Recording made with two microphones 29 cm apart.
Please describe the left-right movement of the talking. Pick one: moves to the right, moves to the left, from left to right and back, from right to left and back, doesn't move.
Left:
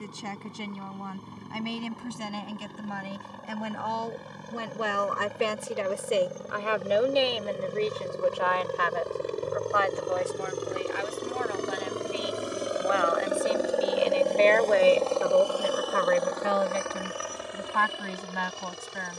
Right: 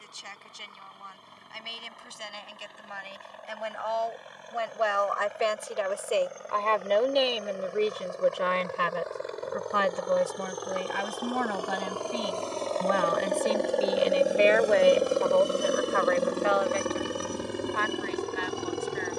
from left to right and back.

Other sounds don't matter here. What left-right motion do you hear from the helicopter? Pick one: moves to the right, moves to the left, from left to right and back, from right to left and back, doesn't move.
moves to the right.